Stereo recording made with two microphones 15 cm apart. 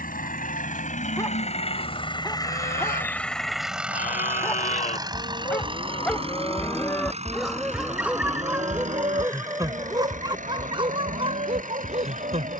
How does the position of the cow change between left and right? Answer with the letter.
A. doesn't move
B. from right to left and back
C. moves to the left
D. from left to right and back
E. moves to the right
E.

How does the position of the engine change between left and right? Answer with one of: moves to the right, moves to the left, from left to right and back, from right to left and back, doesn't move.
moves to the right.